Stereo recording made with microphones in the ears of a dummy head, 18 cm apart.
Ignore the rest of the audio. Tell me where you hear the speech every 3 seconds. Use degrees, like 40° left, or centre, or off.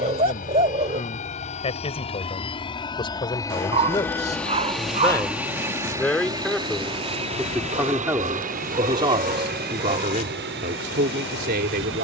30° left, 20° left, 10° right, 40° right.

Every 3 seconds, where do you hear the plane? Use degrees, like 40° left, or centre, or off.
40° left, centre, 30° right, 50° right.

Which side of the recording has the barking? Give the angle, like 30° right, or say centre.
30° right.